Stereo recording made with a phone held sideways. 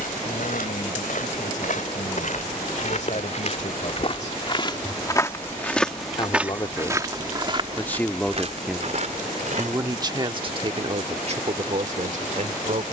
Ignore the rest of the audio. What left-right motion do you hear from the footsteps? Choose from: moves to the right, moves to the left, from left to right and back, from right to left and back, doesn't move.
moves to the right.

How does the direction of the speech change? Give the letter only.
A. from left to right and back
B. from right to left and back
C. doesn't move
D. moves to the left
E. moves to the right
E.